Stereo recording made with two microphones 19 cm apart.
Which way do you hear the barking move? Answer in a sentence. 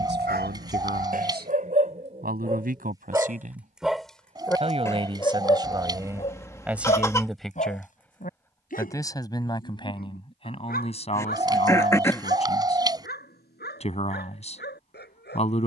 You can hear the barking move from right to left.